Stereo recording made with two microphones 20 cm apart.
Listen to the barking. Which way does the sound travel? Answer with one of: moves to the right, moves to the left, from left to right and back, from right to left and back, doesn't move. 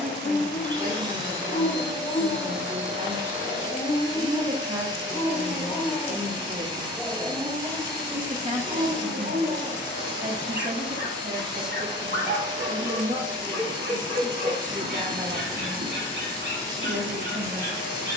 moves to the right.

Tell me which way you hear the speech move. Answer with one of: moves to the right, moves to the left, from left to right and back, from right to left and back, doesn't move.
doesn't move.